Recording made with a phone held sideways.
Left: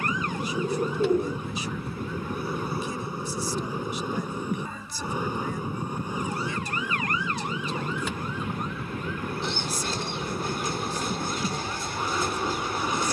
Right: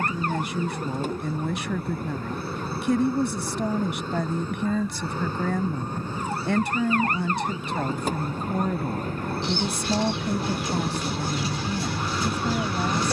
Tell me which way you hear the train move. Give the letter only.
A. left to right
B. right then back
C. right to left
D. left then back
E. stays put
E.